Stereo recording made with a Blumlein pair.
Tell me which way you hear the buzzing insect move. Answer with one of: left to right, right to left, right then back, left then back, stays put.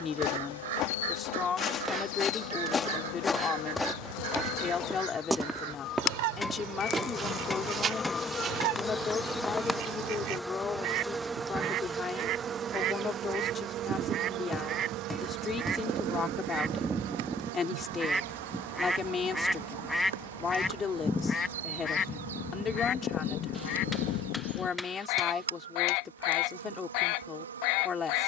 left to right.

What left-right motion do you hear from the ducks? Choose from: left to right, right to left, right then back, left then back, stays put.
right to left.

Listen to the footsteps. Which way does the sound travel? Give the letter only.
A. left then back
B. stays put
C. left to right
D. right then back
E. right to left
C.